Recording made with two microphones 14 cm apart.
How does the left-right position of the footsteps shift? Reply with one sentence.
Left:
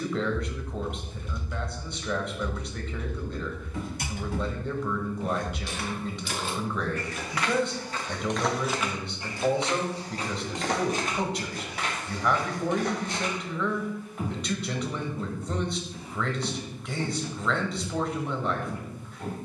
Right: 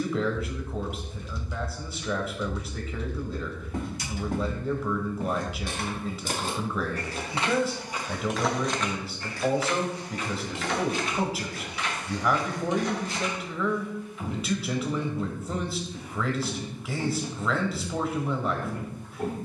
You can hear the footsteps move from right to left and back again.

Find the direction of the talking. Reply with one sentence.
In this clip you hear the talking in the centre.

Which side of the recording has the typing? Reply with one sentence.
You can hear the typing on the left.